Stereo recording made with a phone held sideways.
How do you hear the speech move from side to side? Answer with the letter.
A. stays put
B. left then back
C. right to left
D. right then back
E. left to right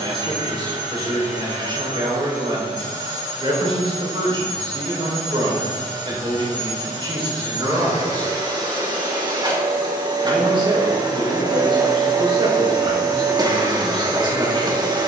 A.